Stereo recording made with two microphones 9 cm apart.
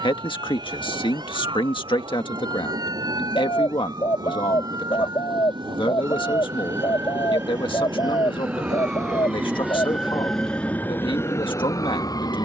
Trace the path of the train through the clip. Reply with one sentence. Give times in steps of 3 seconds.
In this clip you hear the train on the right from 0 s and in the centre from 9 s.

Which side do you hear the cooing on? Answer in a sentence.
You can hear the cooing on the left.